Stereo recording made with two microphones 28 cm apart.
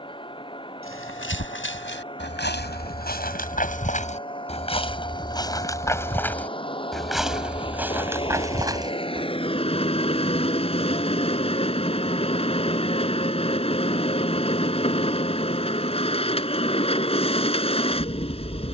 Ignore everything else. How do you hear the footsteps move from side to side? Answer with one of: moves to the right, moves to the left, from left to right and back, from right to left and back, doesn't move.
moves to the right.